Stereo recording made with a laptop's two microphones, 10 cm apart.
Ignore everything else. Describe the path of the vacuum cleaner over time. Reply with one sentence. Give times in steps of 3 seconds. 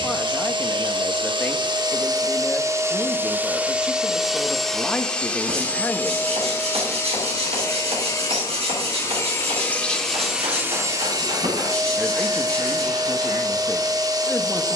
You can hear the vacuum cleaner on the right from 0 s, in the centre from 3 s, on the left from 6 s, in the centre from 9 s and on the right from 12 s.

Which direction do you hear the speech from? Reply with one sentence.
You can hear the speech in the centre.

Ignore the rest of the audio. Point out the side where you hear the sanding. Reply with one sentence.
You can hear the sanding on the right.